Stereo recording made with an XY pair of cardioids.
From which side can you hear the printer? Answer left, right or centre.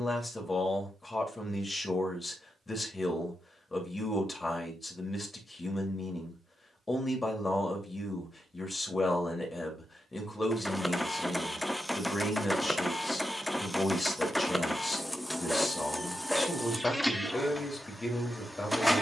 centre.